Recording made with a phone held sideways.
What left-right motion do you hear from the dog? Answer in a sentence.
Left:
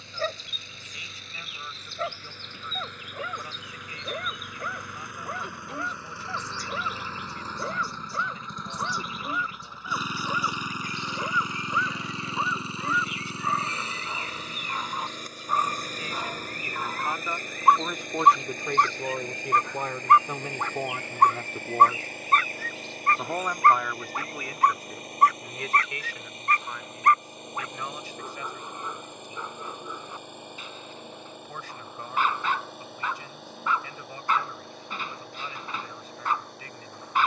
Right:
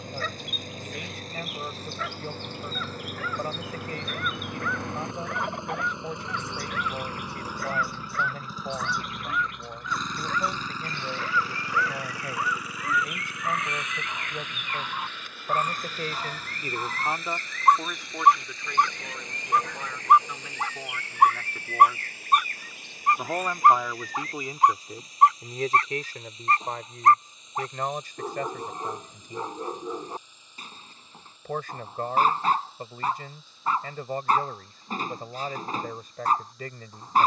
You can hear the dog go from the left side to the right.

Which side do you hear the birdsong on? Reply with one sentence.
In this clip you hear the birdsong on the right.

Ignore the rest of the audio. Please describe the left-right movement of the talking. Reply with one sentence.
In this clip you hear the talking go left and come back.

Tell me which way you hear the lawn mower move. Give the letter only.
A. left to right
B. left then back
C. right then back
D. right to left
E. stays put
D.